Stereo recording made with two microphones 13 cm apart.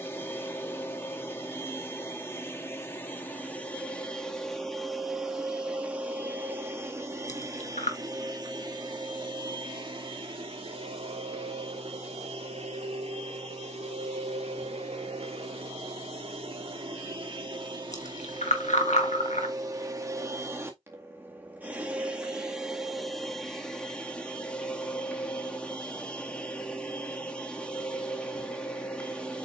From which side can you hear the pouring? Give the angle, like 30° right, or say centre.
70° left.